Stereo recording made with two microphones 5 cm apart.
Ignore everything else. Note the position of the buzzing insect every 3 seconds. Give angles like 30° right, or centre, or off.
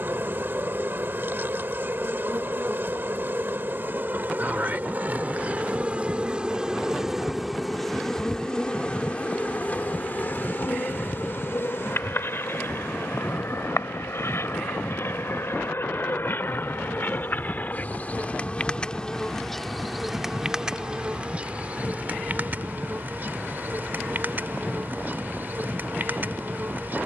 50° right, 40° right, centre, 40° left, 60° left, 50° left, 10° left, 40° right, 50° right.